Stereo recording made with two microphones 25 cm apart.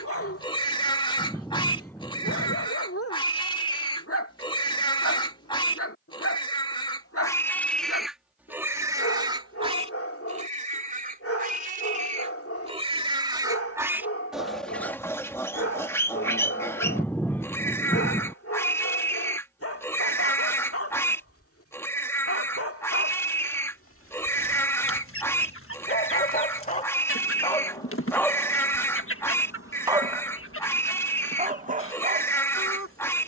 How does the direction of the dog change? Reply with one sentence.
You can hear the dog move to the right.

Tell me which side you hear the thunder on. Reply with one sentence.
In this clip you hear the thunder in the centre.